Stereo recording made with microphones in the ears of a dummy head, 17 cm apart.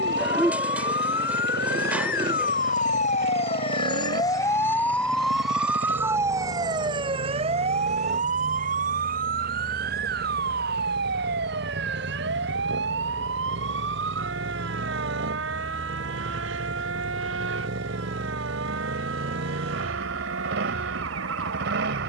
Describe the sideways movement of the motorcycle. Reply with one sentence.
You can hear the motorcycle stay in one place.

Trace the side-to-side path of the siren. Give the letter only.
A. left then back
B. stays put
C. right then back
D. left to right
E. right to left
D.